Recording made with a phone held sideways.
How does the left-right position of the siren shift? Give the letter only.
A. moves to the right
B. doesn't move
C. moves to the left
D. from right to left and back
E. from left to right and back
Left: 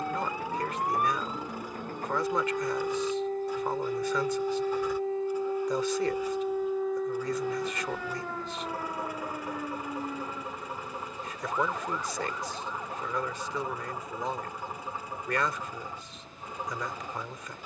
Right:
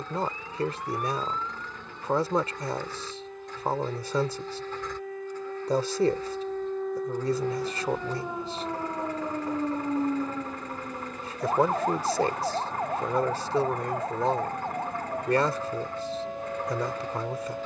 A.